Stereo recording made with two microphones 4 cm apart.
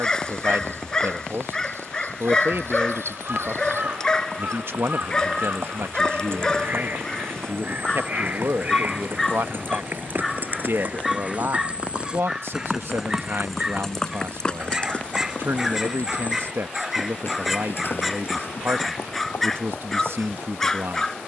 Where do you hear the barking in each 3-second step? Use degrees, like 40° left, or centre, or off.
20° left, 20° left, 20° left, centre, 10° right, centre, 10° left.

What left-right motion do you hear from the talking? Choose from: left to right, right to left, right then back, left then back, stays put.
stays put.